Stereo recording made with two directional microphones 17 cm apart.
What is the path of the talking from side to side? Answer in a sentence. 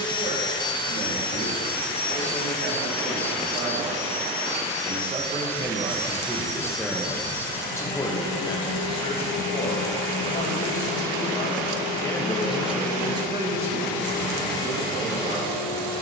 You can hear the talking move from right to left and back again.